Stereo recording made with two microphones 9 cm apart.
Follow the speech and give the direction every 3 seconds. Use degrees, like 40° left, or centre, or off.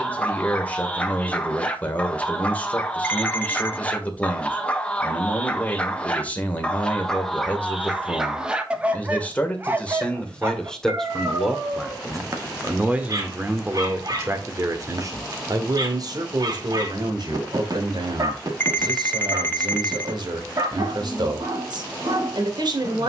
20° left, 20° left, 20° left, 10° left, 20° right, 50° right, 60° right, 60° right.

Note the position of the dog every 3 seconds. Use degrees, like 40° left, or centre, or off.
20° left, 20° left, centre, 30° right, 50° right, 50° right, 50° right, 50° right.